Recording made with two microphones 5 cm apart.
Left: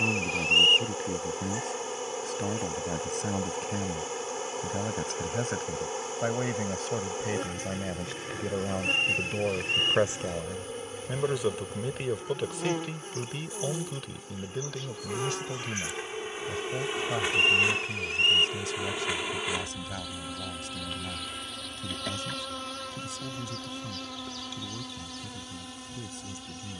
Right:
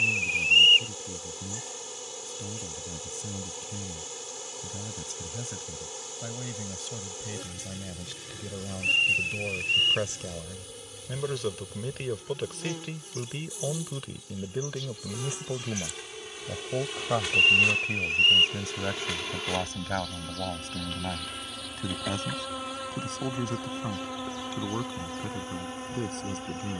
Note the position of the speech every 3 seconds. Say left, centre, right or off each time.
left, left, left, left, centre, right, right, right, right.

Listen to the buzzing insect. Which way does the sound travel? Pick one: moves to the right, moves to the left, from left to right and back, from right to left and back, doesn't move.
moves to the right.